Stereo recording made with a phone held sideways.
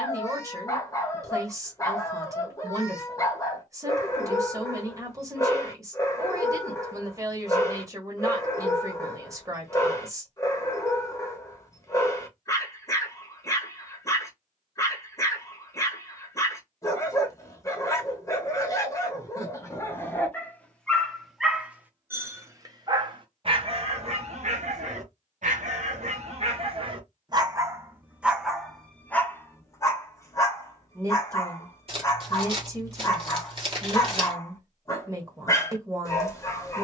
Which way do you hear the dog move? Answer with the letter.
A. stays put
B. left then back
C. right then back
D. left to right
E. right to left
C.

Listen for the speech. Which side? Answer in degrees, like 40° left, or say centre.
20° right.